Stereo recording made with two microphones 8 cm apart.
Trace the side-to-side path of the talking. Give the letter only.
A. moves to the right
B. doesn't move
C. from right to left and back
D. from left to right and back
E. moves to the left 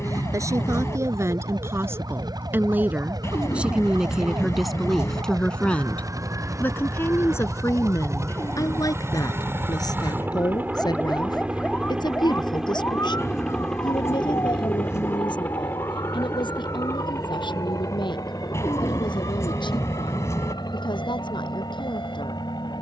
E.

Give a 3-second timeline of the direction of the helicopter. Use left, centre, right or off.
right, right, right, right, centre, left, left, left.